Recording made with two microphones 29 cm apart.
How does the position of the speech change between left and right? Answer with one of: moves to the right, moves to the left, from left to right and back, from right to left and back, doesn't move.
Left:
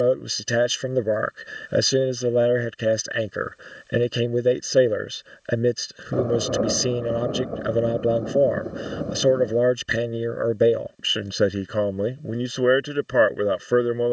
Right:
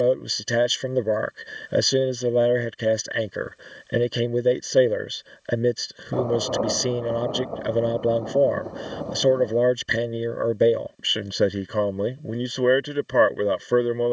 doesn't move.